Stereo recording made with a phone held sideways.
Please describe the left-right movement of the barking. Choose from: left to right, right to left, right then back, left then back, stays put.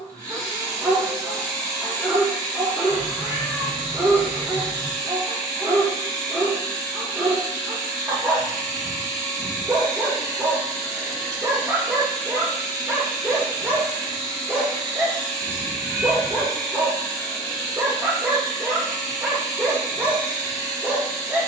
stays put.